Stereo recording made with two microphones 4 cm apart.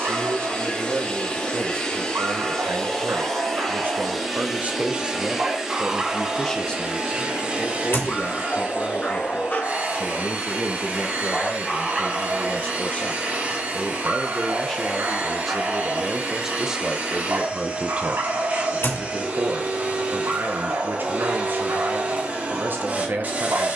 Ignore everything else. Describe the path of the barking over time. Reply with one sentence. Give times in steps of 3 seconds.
You can hear the barking on the right from 0 s, in the centre from 6 s, on the left from 9 s and on the right from 12 s.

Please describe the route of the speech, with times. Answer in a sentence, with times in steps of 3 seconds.
You can hear the speech on the right from 0 s, on the left from 6 s, in the centre from 15 s and on the right from 18 s.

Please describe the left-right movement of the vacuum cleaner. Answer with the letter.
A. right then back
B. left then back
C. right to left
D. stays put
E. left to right
E.